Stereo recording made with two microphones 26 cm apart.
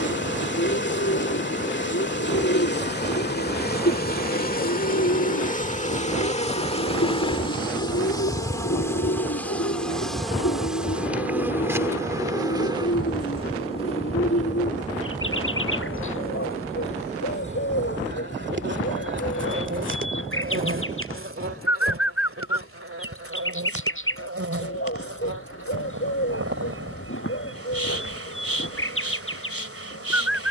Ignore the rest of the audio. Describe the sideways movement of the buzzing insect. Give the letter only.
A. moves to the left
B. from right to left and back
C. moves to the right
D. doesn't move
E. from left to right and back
C.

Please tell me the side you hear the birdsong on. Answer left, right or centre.
left.